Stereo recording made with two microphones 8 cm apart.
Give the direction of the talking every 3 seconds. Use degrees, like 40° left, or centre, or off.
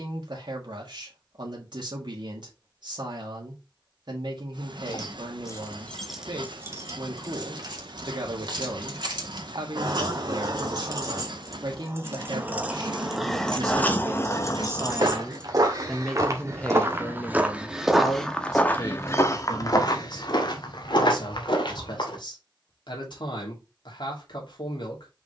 60° right, 60° right, 60° right, 60° right, 50° right, 10° left, 50° left, 60° left, 60° left.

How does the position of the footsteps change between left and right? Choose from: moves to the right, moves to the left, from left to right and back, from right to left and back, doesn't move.
moves to the left.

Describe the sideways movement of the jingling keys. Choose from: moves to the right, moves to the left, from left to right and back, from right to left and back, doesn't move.
from left to right and back.